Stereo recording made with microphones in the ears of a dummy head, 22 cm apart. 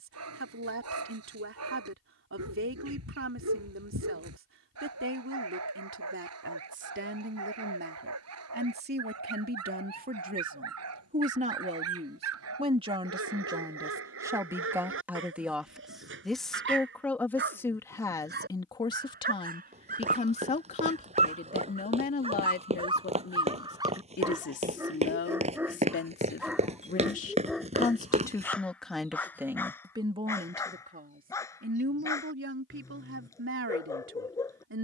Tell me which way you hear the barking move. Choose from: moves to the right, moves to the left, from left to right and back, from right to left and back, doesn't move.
moves to the left.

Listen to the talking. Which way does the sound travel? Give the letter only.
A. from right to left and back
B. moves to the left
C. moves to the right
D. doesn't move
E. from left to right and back
A.